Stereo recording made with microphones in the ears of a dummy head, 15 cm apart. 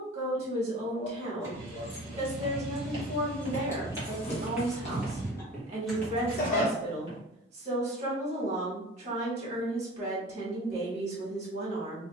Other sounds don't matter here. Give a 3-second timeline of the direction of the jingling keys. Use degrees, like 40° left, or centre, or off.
10° right, 20° left, 10° right, off.